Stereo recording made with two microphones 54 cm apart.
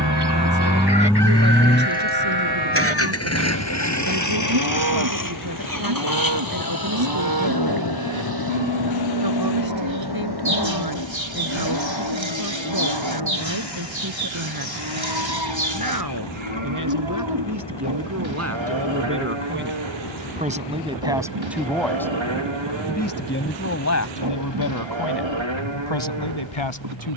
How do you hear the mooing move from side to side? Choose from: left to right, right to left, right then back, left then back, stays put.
stays put.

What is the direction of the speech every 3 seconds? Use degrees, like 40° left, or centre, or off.
40° right, 40° right, 40° right, 40° right, 40° right, 40° right, 20° right, 10° left, 50° left.